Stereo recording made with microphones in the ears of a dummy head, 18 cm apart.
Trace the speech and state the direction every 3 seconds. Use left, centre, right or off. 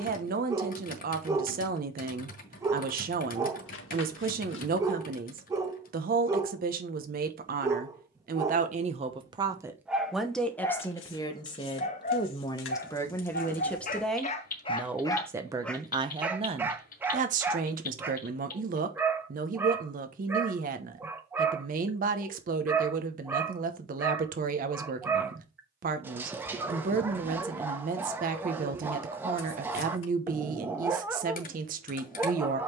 right, right, right, centre, centre, right, right, right, right, right, right.